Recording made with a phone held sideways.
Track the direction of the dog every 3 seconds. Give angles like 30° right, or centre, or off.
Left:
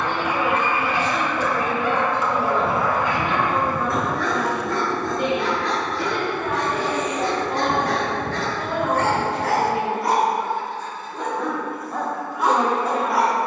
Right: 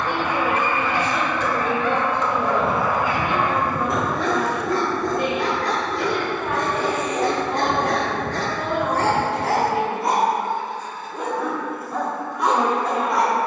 10° left, 30° right, 40° right, 20° right, centre.